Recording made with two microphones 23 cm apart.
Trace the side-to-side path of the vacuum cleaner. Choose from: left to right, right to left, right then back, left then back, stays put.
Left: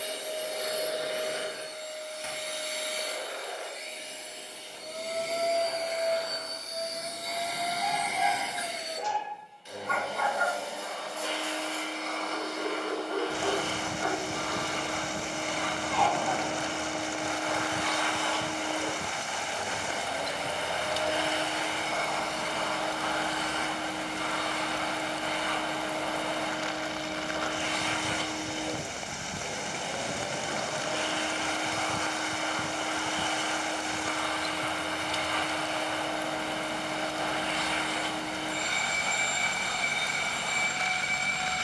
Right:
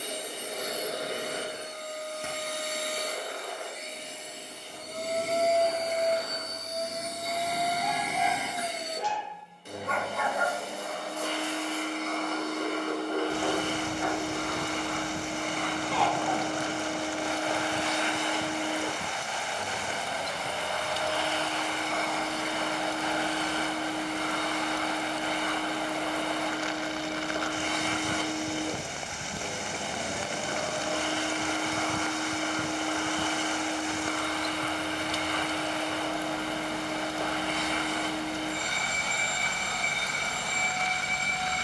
left then back.